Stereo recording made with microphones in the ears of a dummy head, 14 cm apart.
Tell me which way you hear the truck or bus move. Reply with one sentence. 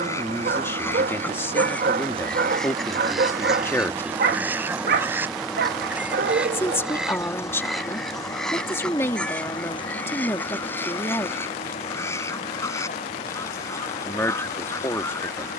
In this clip you hear the truck or bus travel towards the left.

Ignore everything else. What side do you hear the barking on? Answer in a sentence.
You can hear the barking on the right.